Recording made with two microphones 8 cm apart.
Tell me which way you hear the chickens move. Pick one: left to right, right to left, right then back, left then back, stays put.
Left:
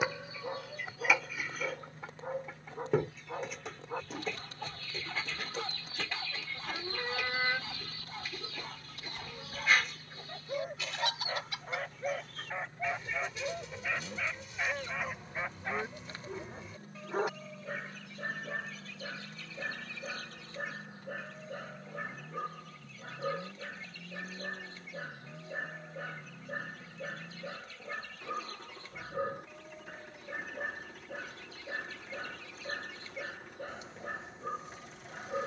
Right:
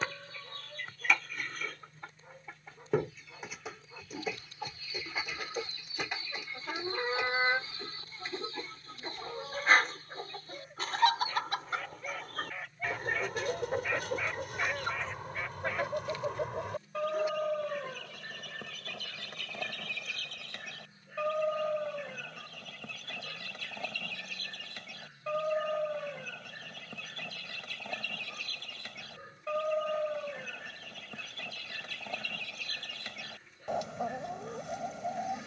left to right.